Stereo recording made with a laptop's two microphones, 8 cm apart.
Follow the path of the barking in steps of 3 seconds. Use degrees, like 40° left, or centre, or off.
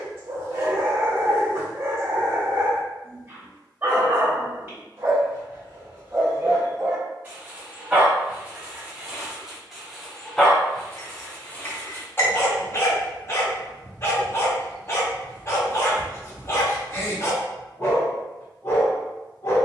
30° right, 30° right, 20° right, 10° left, 30° left, 40° left, 40° left.